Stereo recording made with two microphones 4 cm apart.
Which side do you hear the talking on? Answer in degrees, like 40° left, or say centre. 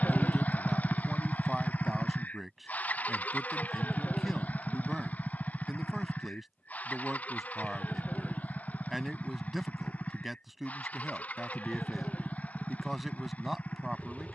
centre.